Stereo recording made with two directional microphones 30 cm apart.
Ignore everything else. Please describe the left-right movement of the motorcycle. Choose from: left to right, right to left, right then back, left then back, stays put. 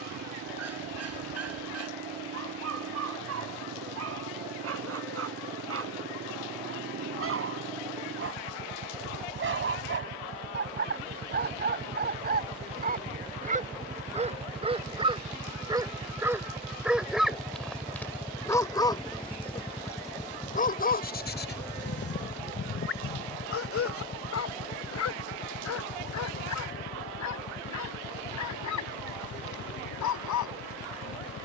right to left.